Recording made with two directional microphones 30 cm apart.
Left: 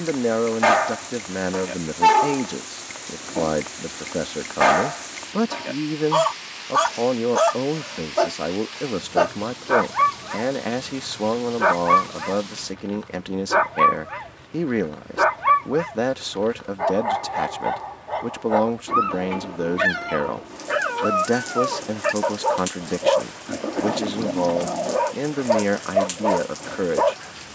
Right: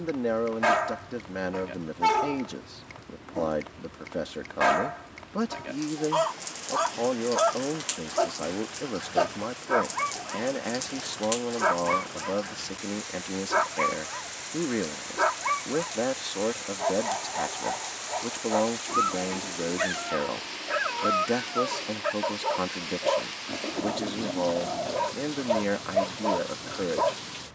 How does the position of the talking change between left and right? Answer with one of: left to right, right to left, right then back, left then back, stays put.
stays put.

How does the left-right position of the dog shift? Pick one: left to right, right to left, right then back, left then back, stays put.
stays put.